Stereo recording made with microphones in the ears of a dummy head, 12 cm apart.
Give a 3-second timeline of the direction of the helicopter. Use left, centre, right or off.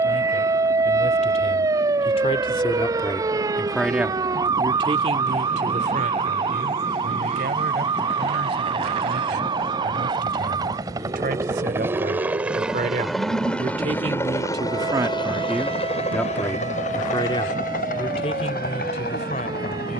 right, right, right, right, centre, left, left.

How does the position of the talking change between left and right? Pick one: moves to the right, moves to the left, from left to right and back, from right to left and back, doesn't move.
from left to right and back.